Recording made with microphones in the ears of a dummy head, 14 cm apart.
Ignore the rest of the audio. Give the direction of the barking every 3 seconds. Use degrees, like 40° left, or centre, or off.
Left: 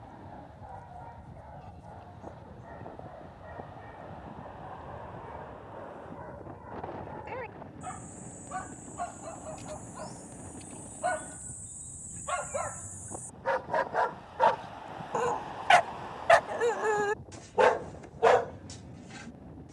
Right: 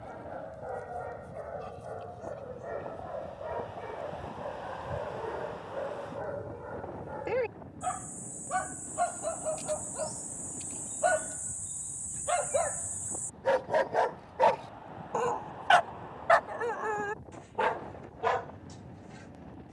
70° right, 60° right, 60° right, 50° right, 30° right, 20° left, 60° left.